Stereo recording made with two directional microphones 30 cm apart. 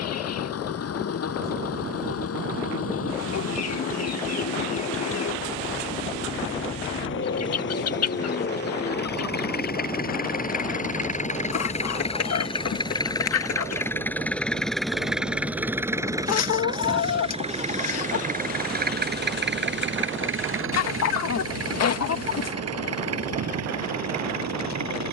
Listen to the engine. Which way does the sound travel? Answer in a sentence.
In this clip you hear the engine go from the left side to the right.